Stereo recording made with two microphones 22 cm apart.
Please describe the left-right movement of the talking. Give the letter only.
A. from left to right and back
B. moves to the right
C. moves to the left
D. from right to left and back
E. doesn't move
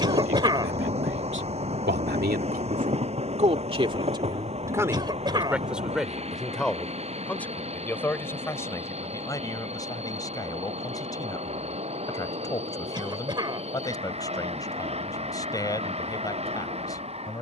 C.